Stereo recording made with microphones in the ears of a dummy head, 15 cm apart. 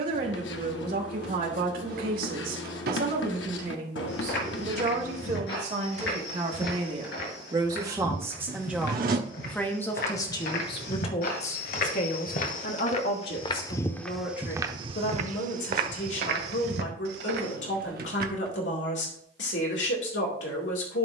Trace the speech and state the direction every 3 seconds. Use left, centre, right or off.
right, right, right, left, left, left, left.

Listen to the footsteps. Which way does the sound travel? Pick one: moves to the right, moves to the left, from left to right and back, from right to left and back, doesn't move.
moves to the right.